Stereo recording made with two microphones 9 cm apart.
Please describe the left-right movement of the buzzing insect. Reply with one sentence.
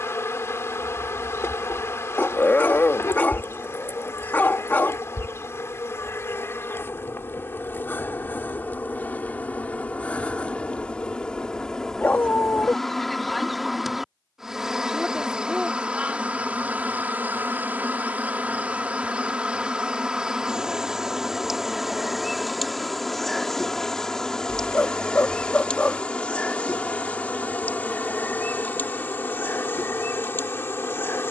In this clip you hear the buzzing insect move from left to right and back again.